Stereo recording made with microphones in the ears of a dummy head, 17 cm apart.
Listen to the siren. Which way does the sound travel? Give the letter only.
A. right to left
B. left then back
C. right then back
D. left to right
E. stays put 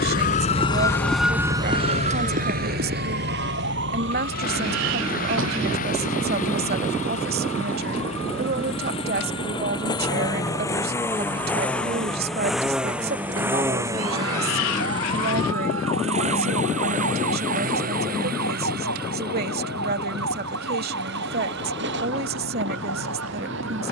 D.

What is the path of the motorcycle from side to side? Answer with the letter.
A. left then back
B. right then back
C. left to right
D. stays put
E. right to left
C.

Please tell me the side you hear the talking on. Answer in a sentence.
In this clip you hear the talking on the right.